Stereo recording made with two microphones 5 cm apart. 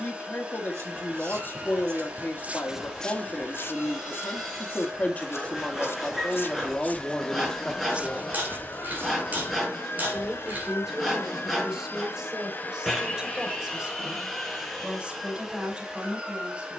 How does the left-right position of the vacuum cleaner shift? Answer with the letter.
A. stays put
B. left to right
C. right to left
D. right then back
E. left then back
E.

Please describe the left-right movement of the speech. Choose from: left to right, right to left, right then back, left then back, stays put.
left to right.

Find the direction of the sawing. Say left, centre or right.
centre.